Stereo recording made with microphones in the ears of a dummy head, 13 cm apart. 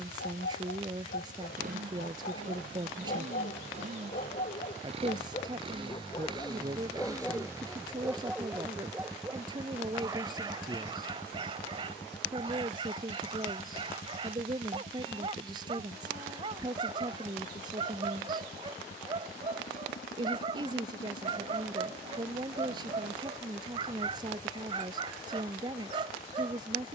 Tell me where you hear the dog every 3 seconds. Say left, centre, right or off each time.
left, left, centre, right, right, right, right, right, right.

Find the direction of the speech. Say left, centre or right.
right.